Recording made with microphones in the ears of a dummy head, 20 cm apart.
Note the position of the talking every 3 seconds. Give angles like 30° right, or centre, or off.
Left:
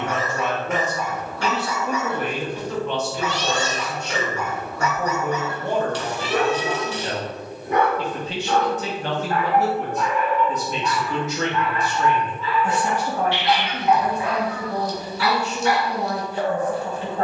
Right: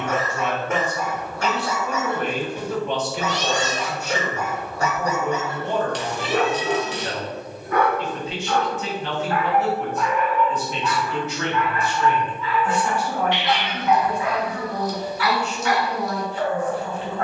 20° left, centre, 30° left, 40° left, 40° left, 40° left.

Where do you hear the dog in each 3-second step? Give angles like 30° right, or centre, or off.
40° right, 30° right, 10° left, 30° left, 30° left, 30° left.